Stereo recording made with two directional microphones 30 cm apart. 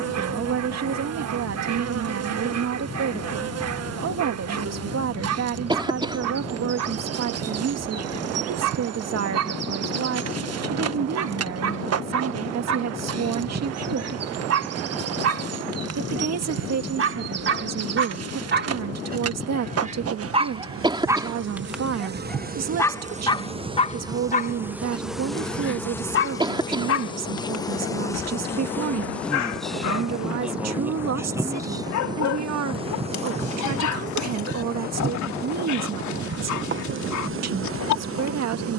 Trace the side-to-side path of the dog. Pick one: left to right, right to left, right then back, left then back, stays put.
right to left.